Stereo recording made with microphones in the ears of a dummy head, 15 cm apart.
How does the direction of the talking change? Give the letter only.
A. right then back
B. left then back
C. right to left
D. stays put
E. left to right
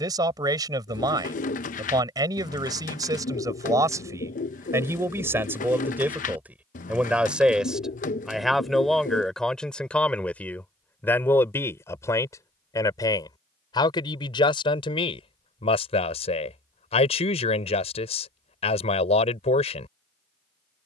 C.